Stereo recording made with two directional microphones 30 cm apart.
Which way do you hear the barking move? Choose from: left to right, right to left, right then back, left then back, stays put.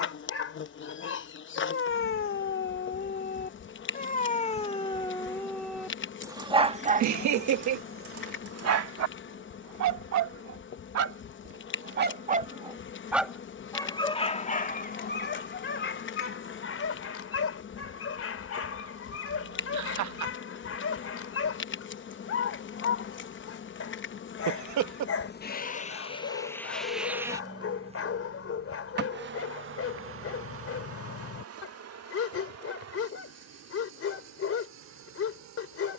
right then back.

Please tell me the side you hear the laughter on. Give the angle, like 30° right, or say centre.
70° right.